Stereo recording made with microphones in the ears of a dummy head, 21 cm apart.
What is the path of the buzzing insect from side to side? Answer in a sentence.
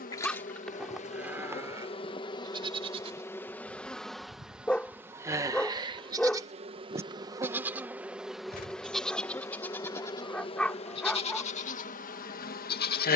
In this clip you hear the buzzing insect move from left to right and back again.